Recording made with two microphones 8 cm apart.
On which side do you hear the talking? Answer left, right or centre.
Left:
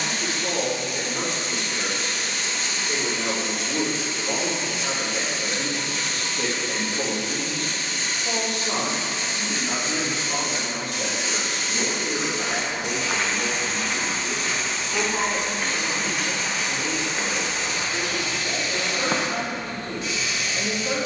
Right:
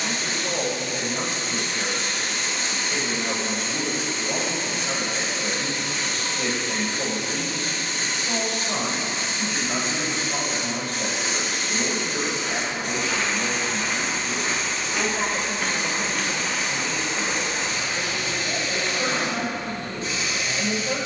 left.